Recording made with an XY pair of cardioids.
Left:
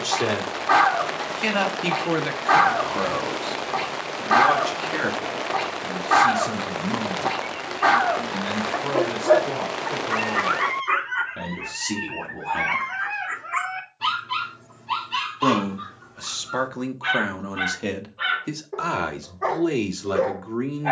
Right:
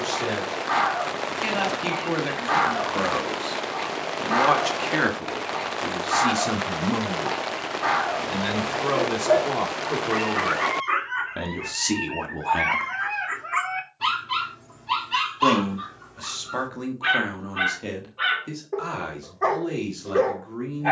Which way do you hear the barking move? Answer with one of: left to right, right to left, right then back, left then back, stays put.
left to right.